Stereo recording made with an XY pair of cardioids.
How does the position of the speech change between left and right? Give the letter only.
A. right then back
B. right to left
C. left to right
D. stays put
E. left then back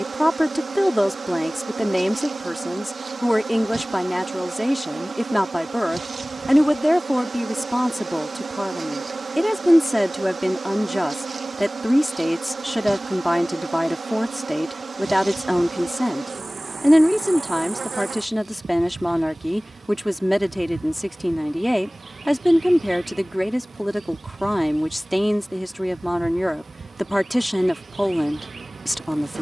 D.